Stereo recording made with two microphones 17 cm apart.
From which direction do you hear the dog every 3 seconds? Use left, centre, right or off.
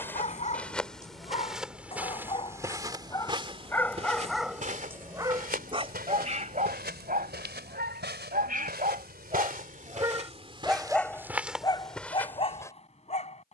left, centre, right, centre, left.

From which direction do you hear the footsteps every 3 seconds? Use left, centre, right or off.
centre, right, right, right, centre.